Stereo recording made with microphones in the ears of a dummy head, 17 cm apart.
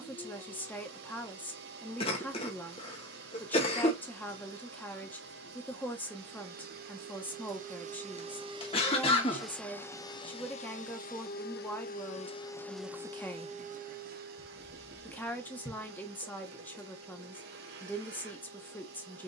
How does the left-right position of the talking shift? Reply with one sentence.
In this clip you hear the talking stay in one place.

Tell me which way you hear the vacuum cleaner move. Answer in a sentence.
In this clip you hear the vacuum cleaner go left and come back.